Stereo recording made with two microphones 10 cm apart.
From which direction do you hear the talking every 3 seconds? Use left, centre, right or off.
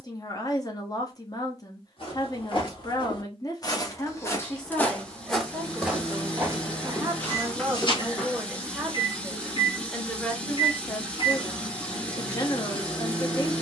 left, centre, centre, centre, left.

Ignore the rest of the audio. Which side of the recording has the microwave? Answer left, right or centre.
left.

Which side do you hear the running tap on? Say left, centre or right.
centre.